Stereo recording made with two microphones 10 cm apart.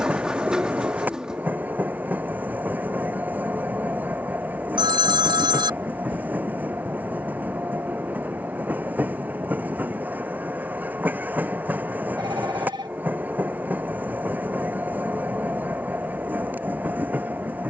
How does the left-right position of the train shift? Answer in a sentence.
You can hear the train stay in one place.